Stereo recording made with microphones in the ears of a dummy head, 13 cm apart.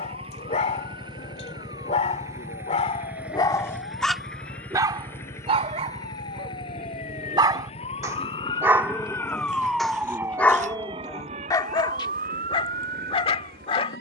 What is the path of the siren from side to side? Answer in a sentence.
In this clip you hear the siren move to the right.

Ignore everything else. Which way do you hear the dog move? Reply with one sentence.
In this clip you hear the dog move from left to right and back again.